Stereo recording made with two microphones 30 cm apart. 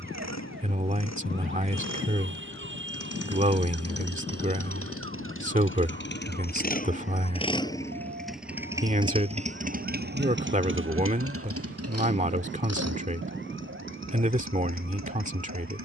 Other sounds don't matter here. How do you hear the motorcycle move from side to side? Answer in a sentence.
In this clip you hear the motorcycle go from the left side to the right.